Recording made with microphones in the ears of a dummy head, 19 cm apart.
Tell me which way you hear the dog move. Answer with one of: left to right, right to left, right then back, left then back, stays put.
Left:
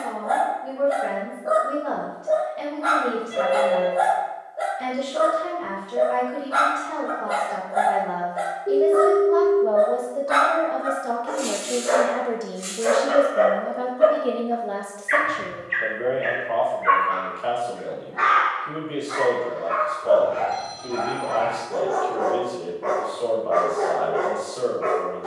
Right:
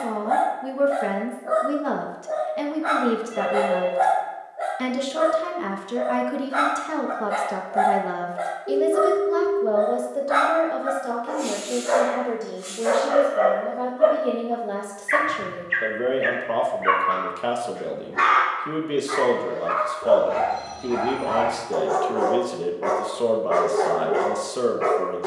left to right.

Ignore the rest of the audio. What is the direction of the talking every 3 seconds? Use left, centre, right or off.
right, right, right, centre, centre, right, right, right, right.